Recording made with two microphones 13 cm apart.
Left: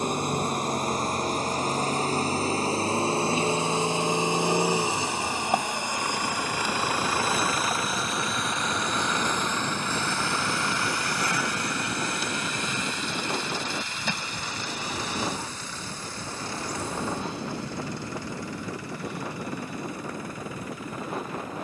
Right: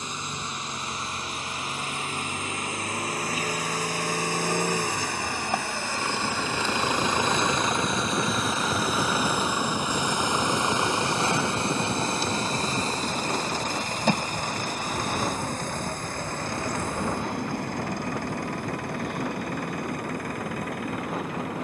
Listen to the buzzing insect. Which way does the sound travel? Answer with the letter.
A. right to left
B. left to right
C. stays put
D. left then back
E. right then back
B.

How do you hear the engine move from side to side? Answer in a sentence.
You can hear the engine go from the left side to the right.